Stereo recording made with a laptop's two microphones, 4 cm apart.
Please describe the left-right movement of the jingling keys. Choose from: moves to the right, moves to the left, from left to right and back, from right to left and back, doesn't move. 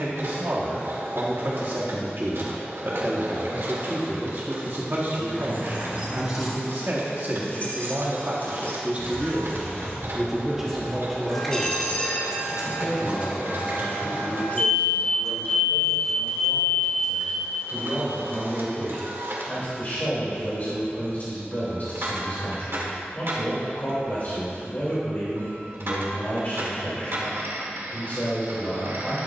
from right to left and back.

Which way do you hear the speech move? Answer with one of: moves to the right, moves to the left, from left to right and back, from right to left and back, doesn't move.
moves to the left.